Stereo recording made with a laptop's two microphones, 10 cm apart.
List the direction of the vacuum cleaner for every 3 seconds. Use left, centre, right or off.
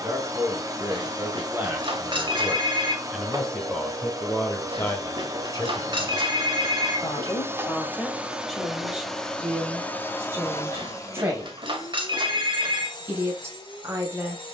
right, right, right, left, left.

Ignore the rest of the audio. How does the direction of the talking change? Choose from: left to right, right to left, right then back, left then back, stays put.
left then back.